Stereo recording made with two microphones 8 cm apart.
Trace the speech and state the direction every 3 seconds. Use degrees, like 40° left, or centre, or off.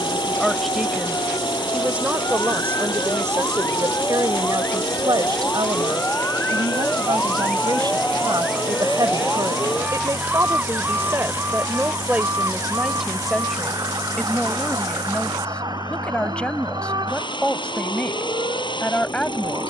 10° right, 60° right, 70° right, 40° right, centre, 10° left, 10° left.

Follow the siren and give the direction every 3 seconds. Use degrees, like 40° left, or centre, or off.
50° left, 30° left, 10° left, 20° right, 50° right, 60° right, 60° right.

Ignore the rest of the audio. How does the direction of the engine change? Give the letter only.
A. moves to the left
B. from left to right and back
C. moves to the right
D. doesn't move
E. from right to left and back
D.